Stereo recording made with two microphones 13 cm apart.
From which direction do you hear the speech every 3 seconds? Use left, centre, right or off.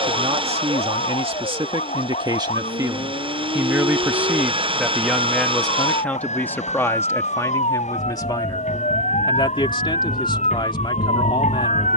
right, centre, left, left.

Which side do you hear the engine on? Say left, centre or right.
right.